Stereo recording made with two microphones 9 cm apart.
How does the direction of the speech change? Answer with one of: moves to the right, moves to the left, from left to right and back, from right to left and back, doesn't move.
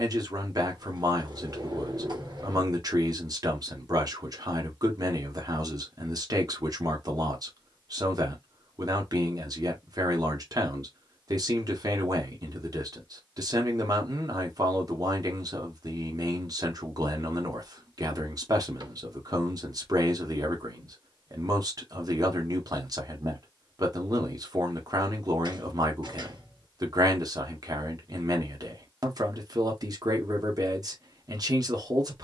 doesn't move.